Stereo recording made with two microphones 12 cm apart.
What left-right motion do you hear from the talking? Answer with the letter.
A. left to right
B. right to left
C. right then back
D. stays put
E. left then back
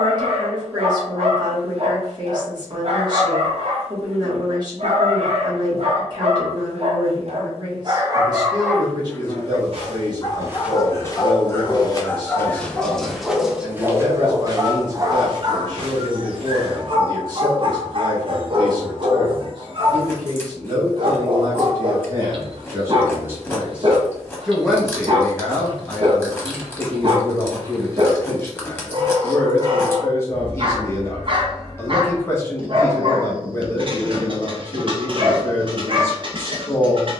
B.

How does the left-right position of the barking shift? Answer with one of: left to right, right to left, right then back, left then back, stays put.
left then back.